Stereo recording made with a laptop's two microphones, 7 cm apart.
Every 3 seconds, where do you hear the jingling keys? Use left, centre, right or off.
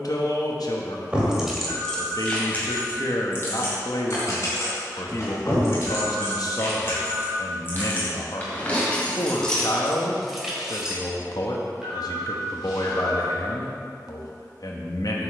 centre, left, left, centre, off.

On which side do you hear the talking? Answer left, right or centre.
left.